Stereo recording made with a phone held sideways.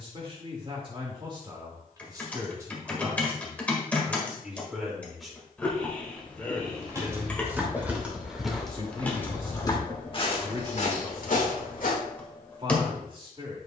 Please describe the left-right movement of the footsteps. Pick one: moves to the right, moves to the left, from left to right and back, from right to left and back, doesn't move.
moves to the left.